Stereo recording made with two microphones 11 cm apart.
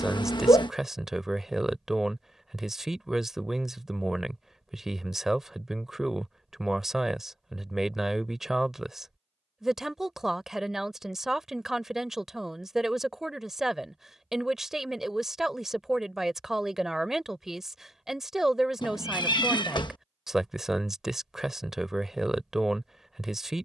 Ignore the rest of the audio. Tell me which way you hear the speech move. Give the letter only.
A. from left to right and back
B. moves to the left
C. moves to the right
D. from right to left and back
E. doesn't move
E.